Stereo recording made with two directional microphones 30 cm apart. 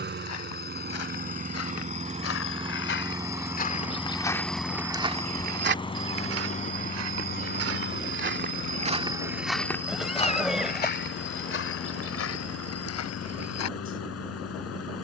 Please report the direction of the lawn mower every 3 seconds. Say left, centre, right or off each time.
right, centre, left, left, left.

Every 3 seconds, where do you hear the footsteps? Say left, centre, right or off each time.
left, centre, right, left, left.